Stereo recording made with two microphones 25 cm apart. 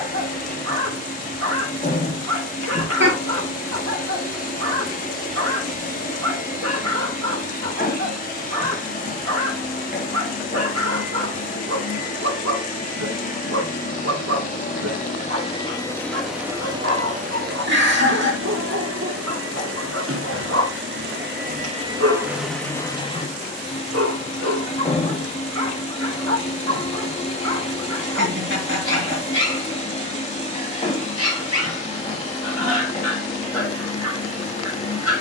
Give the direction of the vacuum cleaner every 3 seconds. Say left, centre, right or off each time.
left, left, left, left, left, centre, right, centre, left, left, left, left.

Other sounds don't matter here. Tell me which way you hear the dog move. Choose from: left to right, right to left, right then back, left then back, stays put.
stays put.